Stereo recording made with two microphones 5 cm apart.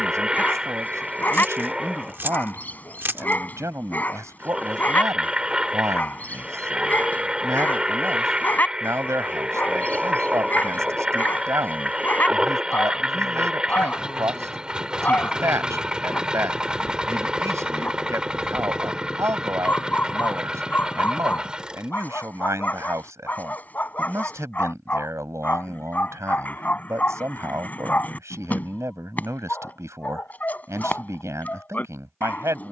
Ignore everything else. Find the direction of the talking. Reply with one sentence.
In this clip you hear the talking on the right.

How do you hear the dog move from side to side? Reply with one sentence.
In this clip you hear the dog stay in one place.